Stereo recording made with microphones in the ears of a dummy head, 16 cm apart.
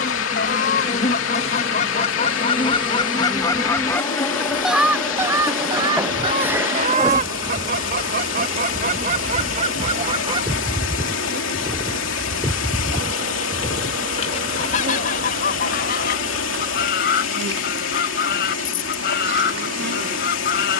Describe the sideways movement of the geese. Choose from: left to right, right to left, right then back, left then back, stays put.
right then back.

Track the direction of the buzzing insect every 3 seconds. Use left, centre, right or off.
left, centre, right, right, right, right, right.